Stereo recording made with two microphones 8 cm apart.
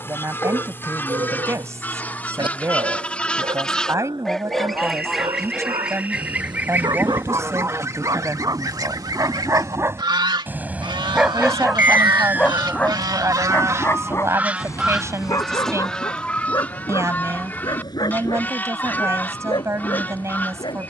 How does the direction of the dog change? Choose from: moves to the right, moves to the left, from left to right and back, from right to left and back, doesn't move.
moves to the left.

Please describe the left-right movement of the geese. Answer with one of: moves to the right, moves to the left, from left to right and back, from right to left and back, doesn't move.
from left to right and back.